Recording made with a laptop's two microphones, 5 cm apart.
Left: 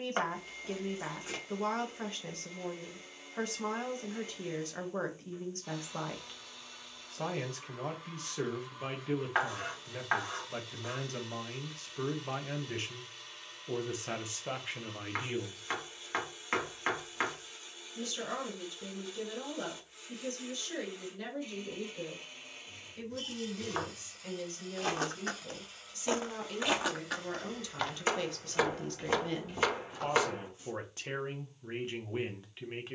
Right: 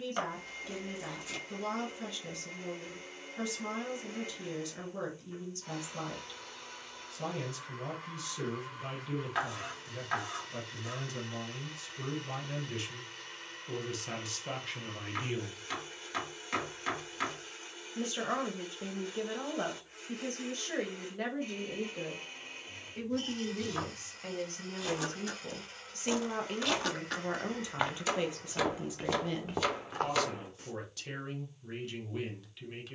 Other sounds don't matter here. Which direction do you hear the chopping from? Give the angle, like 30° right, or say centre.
40° left.